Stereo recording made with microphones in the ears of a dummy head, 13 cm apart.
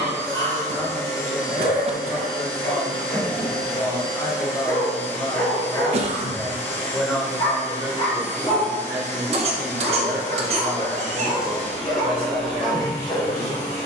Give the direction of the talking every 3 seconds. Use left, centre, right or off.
left, left, centre, right, right.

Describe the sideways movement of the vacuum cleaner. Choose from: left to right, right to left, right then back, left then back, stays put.
stays put.